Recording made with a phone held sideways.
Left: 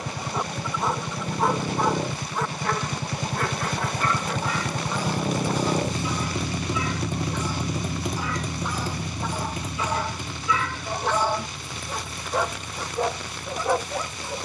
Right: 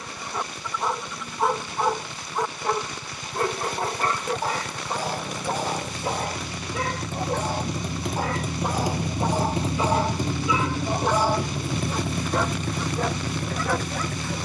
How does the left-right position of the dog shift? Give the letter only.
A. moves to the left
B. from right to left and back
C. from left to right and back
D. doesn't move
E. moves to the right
C.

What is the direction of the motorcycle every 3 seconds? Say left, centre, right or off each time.
left, left, centre, right, right.